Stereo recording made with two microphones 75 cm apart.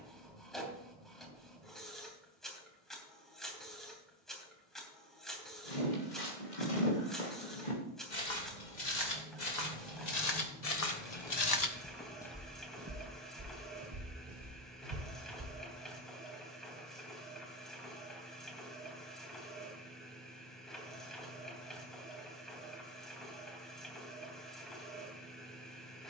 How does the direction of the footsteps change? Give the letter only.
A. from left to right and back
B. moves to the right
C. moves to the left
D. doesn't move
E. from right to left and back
B.